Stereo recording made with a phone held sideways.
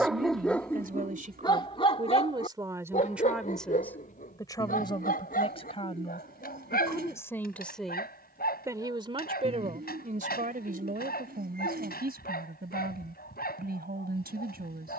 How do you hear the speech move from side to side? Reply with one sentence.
In this clip you hear the speech go left and come back.